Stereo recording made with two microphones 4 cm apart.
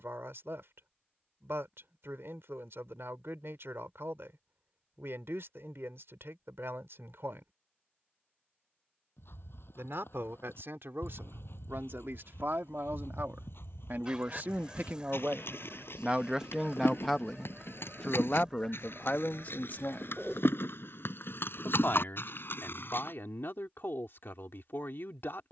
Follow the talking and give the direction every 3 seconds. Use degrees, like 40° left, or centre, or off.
80° right, 80° right, 80° right, 70° right, 60° right, 20° right, 40° left, 60° left, 60° left.